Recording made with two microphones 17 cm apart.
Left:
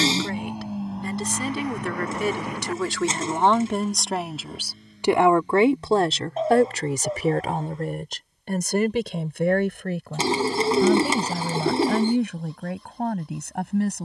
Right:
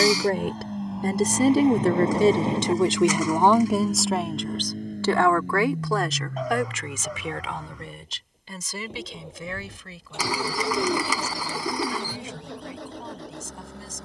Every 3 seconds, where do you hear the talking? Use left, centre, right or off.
right, centre, left, left, left.